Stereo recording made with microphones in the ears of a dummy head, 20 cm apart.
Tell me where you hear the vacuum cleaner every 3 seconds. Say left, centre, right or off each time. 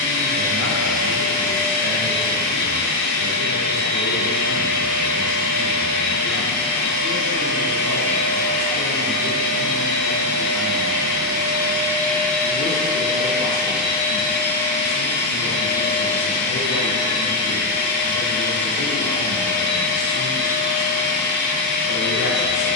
left, left, left, left, centre, left, left, left.